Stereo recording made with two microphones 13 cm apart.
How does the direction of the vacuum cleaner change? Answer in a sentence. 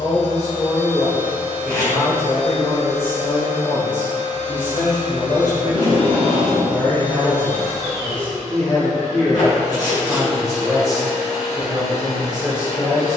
You can hear the vacuum cleaner stay in one place.